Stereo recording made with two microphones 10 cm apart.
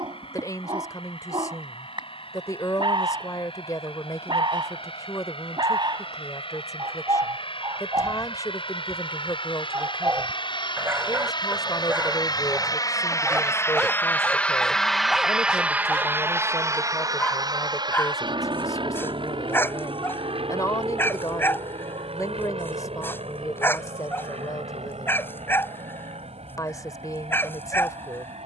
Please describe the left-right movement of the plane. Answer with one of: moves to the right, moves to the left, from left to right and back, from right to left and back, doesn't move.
moves to the right.